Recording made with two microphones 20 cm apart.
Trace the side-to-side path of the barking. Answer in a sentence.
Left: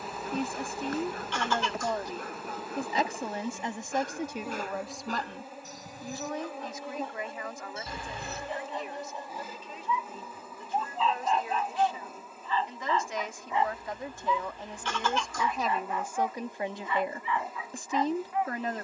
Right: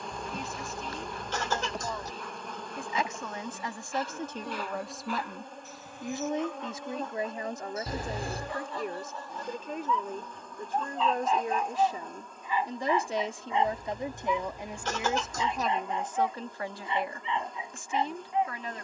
You can hear the barking move from left to right.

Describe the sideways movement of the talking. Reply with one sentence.
In this clip you hear the talking move from left to right and back again.